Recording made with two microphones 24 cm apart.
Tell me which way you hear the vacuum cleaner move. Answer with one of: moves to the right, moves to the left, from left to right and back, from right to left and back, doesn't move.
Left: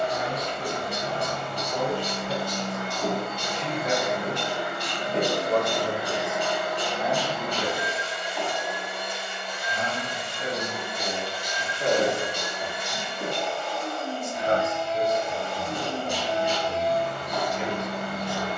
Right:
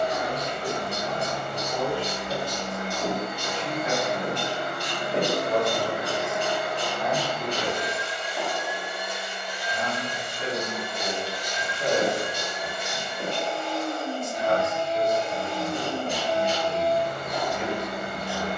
from right to left and back.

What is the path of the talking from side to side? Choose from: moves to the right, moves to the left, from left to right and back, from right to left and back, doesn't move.
from left to right and back.